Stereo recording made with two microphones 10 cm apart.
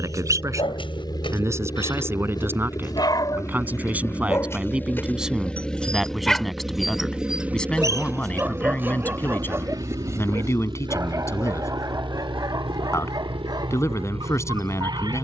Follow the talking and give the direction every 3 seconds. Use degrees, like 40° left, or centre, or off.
30° right, 10° right, 10° left, 30° left, 30° left.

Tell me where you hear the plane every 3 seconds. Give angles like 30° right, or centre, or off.
50° left, 20° left, 10° right, 40° right, 60° right.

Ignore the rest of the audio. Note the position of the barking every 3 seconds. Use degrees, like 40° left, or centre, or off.
60° left, 30° left, 10° right, 30° right, 40° right.